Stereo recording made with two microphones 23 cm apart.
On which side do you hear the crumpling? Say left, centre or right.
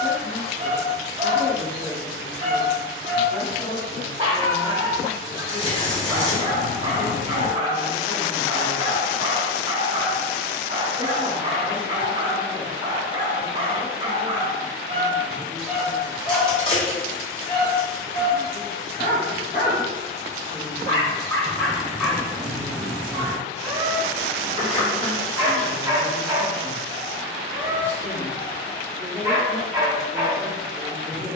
left.